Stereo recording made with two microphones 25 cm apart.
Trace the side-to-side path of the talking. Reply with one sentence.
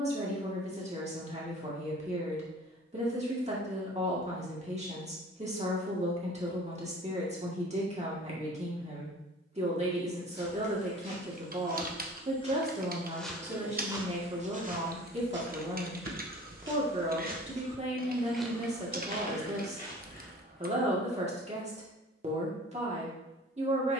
You can hear the talking stay in one place.